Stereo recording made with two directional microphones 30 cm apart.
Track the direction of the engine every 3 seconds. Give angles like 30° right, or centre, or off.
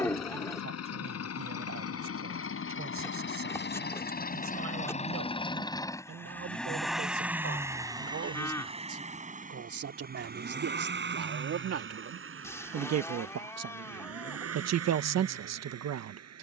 50° left, 30° left, 10° right, 30° right, 50° right, 50° right.